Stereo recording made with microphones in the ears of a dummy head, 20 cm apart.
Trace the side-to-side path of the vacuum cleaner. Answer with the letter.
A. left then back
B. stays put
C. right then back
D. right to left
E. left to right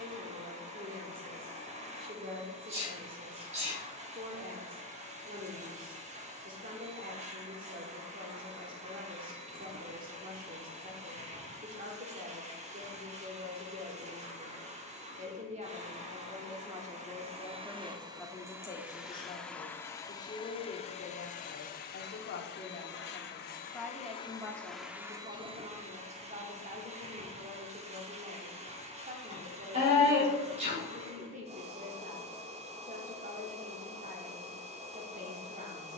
A.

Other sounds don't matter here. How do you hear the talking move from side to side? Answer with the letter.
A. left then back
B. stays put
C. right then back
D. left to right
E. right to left
A.